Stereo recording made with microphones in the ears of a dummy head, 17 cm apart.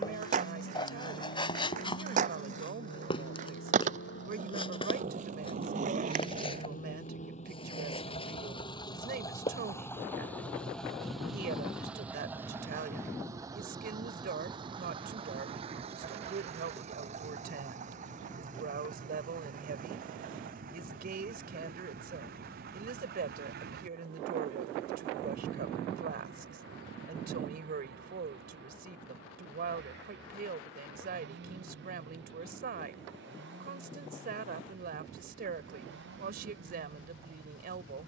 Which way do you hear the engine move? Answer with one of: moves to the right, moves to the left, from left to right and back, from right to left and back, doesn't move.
moves to the right.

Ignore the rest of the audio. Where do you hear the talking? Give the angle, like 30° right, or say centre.
50° right.